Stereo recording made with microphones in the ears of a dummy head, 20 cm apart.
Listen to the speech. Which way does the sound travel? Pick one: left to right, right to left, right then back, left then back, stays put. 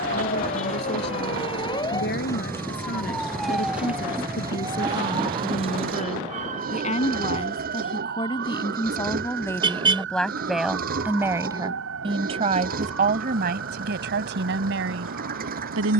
left to right.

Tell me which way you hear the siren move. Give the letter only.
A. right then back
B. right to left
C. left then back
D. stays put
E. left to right
E.